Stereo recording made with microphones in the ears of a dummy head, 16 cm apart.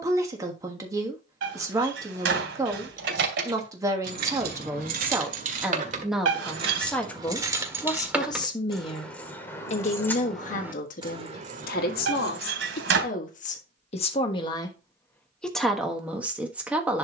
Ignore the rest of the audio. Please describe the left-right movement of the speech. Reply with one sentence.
In this clip you hear the speech move from right to left and back again.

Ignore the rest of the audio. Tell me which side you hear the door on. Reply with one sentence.
You can hear the door on the right.